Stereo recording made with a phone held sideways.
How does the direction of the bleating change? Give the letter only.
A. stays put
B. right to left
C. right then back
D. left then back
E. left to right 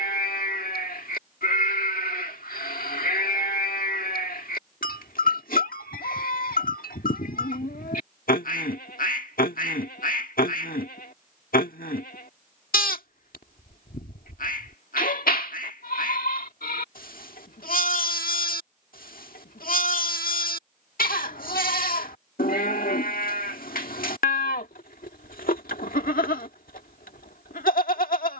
A.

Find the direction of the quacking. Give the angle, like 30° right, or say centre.
70° left.